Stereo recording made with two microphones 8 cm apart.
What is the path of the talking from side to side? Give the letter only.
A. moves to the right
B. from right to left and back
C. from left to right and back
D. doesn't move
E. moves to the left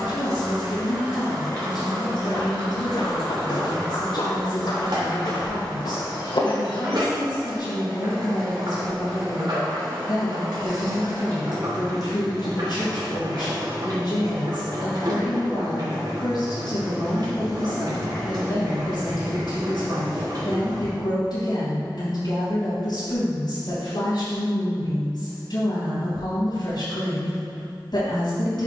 D.